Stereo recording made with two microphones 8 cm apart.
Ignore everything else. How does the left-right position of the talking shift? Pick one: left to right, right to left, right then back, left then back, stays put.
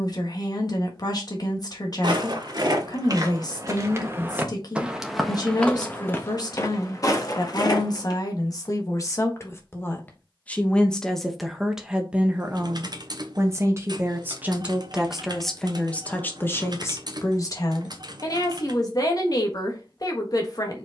right then back.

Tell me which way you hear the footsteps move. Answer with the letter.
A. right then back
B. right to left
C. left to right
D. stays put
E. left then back
B.